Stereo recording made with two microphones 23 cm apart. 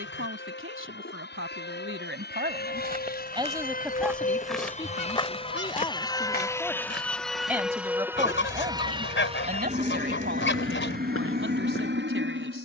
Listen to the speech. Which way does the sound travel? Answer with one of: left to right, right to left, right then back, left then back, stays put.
left then back.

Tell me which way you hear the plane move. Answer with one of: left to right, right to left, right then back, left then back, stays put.
left to right.